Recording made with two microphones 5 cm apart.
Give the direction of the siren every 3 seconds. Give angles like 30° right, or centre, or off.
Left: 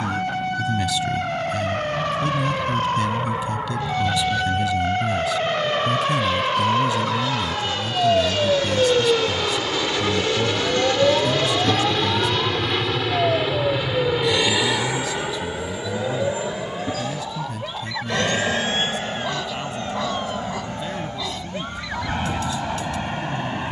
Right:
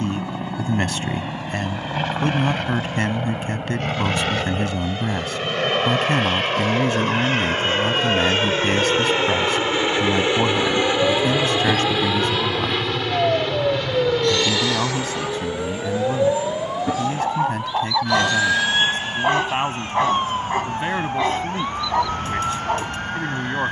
70° left, 60° left, 40° left, 20° left, 10° right, 30° right, 40° right, 50° right.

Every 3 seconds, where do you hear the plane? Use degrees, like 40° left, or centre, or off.
70° right, 60° right, 40° right, 20° right, 10° left, 30° left, 40° left, 50° left.